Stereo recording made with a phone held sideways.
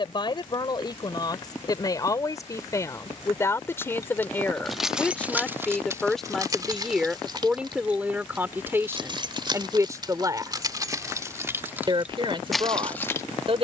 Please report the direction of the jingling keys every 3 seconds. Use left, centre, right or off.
off, centre, right, right, centre.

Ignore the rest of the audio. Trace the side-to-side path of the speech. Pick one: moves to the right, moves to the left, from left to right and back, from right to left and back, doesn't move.
moves to the right.